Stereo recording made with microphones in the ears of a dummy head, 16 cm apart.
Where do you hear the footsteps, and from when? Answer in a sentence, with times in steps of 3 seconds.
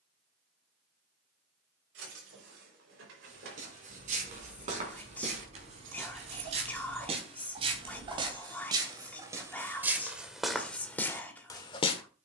In this clip you hear the footsteps not at all from 0 s, on the right from 3 s and in the centre from 9 s.